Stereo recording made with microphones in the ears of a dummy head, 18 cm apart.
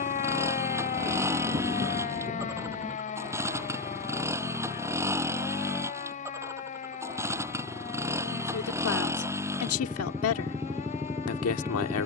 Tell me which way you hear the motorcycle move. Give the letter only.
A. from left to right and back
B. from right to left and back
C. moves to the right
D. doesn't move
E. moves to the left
D.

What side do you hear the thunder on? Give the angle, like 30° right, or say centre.
30° right.